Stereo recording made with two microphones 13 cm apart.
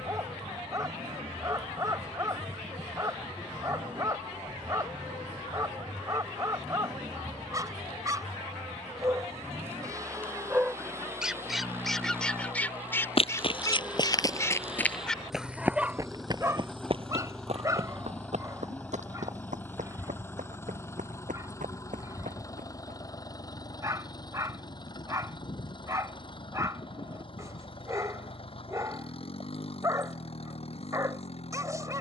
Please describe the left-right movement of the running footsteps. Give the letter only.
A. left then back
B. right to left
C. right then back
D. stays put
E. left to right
E.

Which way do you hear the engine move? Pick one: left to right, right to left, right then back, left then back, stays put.
right to left.